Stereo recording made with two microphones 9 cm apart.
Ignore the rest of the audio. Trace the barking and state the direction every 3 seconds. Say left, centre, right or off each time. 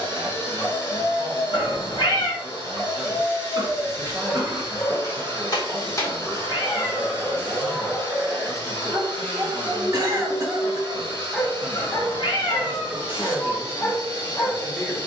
left, left, centre, centre, left.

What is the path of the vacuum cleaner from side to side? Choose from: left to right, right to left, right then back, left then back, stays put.
stays put.